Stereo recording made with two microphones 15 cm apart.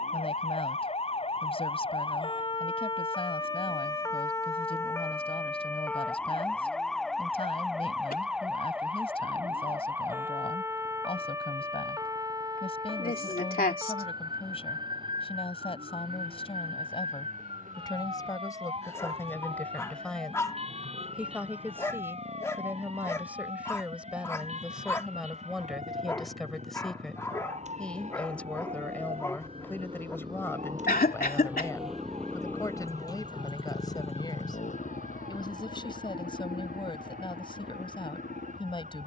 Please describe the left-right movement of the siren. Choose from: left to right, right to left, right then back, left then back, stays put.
left to right.